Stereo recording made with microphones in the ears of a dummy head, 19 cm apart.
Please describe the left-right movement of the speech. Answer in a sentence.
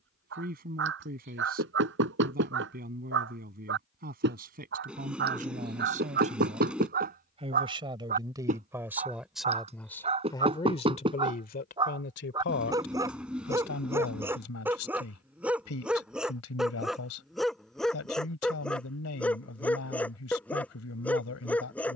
You can hear the speech move from right to left.